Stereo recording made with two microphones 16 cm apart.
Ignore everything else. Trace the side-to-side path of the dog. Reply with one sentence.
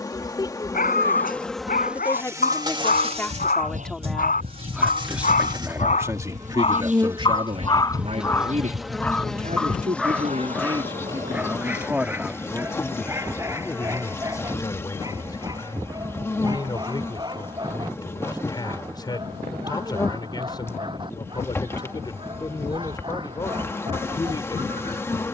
You can hear the dog travel towards the right.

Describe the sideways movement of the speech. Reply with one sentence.
You can hear the speech go right and come back.